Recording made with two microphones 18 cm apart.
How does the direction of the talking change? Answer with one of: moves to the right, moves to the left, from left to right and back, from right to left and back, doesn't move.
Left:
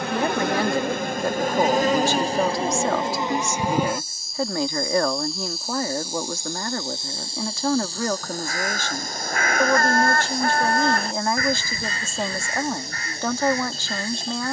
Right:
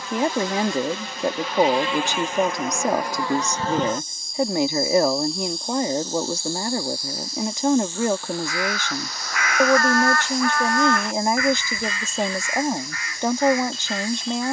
doesn't move.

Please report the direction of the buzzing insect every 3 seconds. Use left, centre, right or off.
left, centre, left, left, left.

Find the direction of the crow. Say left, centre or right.
left.